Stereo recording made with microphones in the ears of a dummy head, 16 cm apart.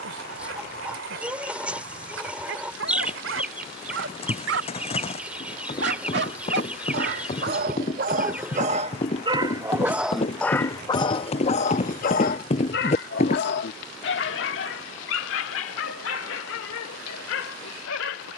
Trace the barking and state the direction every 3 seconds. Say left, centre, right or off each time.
right, right, right, centre, left, left.